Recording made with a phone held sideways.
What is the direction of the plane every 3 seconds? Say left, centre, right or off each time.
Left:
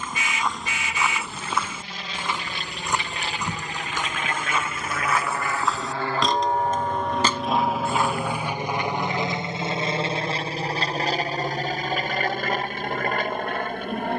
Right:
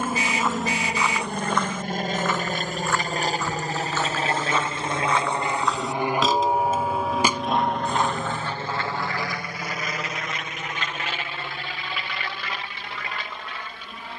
right, right, centre, left, left.